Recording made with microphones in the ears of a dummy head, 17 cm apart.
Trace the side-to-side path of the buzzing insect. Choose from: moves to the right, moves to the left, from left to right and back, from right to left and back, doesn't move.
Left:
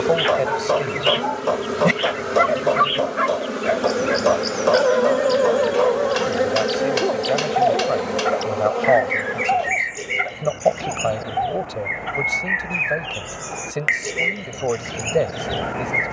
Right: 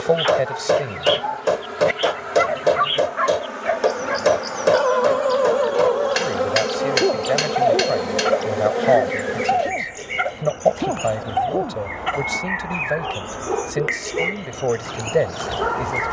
moves to the right.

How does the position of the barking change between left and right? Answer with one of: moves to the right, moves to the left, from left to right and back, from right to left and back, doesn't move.
moves to the right.